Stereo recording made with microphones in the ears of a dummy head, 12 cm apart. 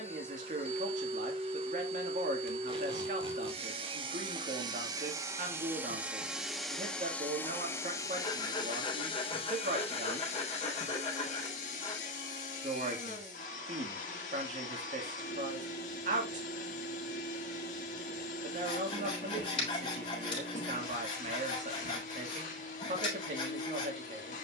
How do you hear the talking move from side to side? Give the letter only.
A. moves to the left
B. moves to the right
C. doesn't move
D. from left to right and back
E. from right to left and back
C.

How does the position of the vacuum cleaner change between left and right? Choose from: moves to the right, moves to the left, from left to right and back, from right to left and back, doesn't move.
moves to the left.